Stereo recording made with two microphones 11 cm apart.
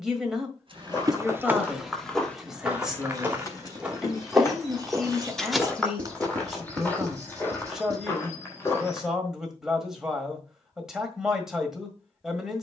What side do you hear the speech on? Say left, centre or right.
centre.